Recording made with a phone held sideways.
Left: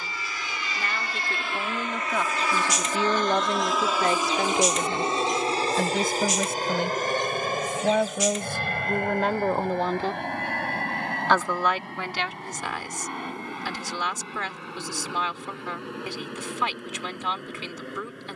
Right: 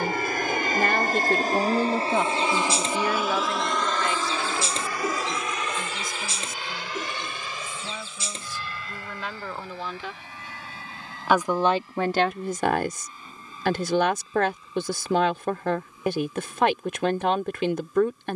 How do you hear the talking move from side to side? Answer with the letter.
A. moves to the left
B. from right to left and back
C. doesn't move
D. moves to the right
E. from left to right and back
B.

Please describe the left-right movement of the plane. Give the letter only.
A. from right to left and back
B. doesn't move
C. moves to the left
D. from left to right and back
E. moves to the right
C.